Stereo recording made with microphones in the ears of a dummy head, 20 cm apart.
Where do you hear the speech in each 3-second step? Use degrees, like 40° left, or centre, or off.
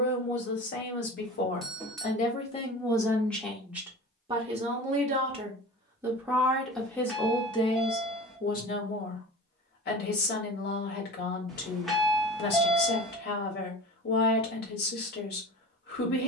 40° left, 20° right, 20° left, 50° left, 50° left, 50° left.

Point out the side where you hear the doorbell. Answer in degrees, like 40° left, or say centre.
centre.